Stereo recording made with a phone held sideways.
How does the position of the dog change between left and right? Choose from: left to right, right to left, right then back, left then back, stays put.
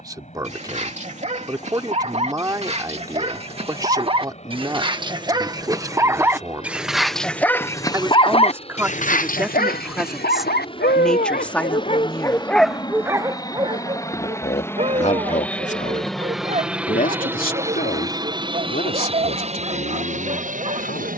left then back.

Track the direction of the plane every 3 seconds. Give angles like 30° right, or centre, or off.
50° left, 50° left, 40° left, 40° left, 20° left, centre, 40° right.